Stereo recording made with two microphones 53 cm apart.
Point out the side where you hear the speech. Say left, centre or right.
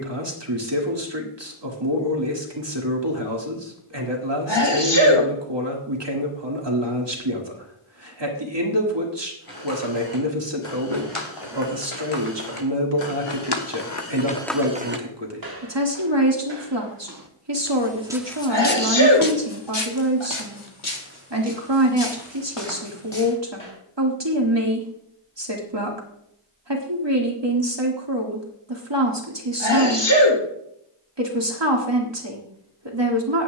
right.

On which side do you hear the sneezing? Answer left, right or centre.
left.